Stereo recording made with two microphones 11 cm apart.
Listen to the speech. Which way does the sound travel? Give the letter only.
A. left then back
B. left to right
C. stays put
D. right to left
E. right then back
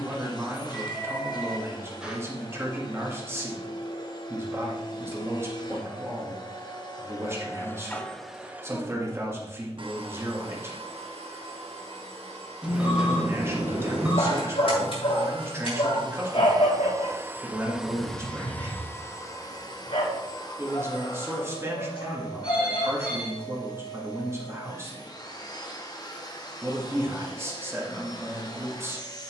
C.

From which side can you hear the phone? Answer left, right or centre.
centre.